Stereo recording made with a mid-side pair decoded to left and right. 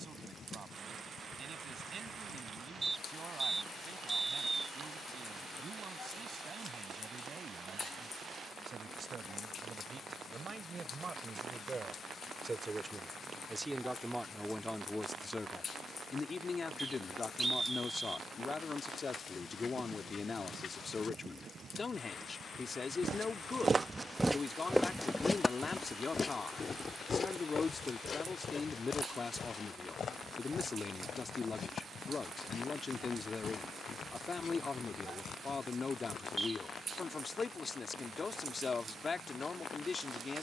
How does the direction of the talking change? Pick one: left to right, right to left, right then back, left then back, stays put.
right to left.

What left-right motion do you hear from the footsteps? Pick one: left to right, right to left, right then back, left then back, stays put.
right to left.